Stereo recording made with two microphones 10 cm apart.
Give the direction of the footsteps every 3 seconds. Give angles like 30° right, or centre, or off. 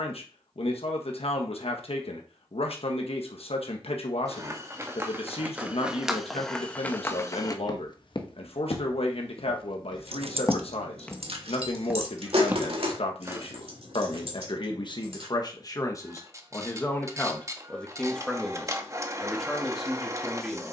off, 20° right, 30° left, 40° left, 20° right, off, off.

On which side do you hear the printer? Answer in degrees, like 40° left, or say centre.
30° right.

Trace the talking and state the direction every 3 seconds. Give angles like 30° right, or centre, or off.
70° left, 70° left, 70° left, 70° left, 70° left, 30° left, centre.